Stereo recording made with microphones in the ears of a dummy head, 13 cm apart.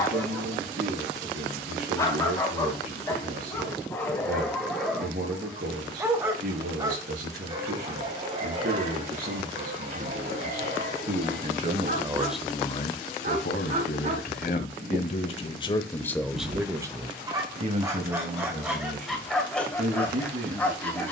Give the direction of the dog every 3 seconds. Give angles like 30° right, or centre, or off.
20° left, 10° left, 30° right, 50° right, 50° right, 30° right, centre.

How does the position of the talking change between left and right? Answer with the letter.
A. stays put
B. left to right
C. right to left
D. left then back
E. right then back
D.